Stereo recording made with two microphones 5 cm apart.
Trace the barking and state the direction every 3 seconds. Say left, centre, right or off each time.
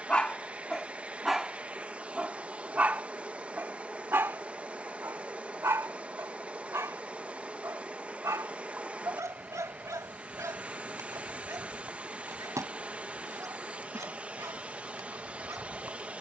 centre, right, right, right, right, right.